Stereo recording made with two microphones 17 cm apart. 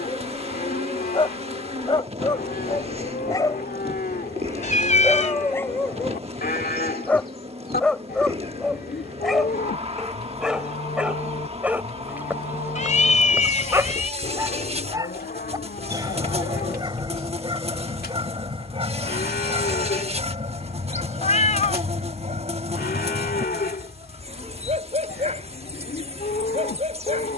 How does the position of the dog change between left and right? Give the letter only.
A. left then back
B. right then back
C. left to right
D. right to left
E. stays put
C.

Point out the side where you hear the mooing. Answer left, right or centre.
left.